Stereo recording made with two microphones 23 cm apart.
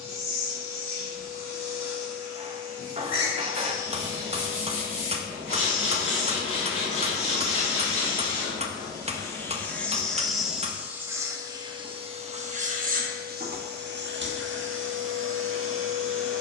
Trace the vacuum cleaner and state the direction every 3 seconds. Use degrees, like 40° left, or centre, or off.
40° left, 40° left, 30° left, centre, 50° right, 70° right.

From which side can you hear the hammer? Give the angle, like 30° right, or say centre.
30° right.